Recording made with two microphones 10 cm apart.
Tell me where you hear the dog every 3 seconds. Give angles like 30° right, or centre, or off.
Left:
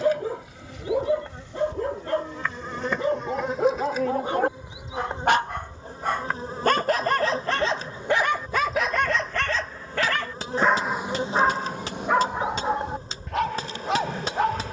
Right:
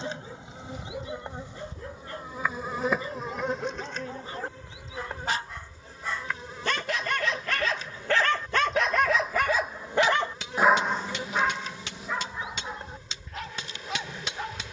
80° left, 70° left, 30° left, 10° left, 80° left.